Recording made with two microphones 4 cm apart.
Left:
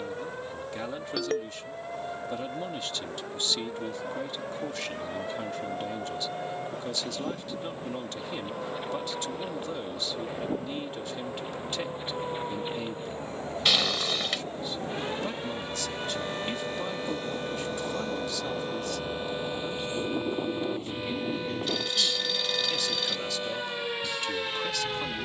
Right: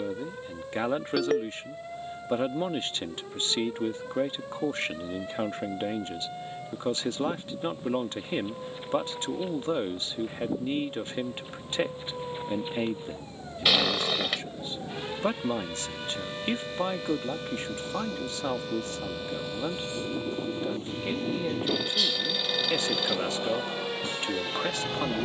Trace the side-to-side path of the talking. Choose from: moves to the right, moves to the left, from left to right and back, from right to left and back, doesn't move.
doesn't move.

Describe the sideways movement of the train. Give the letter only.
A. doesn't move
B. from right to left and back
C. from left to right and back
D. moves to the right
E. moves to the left
D.